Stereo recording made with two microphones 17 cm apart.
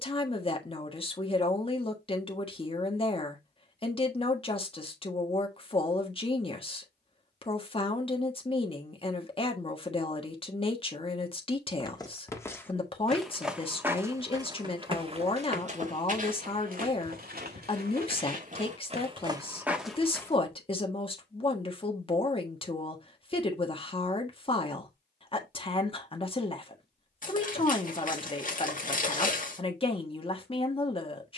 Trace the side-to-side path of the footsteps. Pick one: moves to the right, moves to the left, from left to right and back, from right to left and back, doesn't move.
from left to right and back.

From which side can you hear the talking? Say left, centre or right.
left.